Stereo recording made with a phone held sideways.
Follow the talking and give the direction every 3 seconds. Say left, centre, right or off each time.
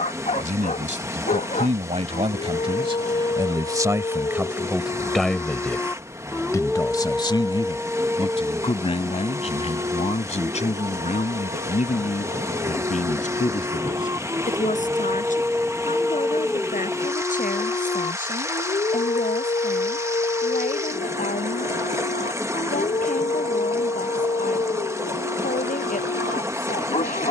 right, centre, left, left, left, left, left, left, left.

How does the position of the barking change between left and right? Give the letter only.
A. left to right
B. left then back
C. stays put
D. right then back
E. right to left
D.